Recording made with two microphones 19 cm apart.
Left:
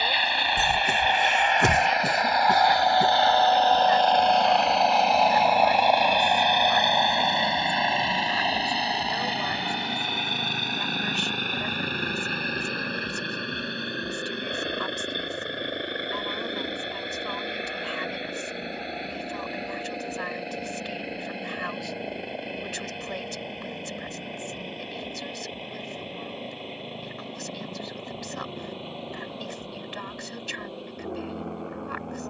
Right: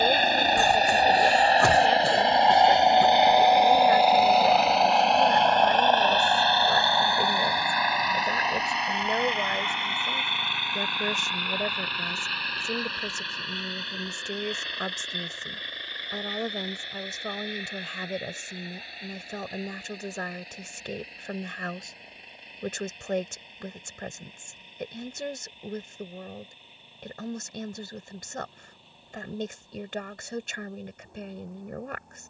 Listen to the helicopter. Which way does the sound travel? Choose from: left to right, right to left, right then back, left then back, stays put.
right to left.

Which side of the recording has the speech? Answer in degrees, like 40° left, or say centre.
50° right.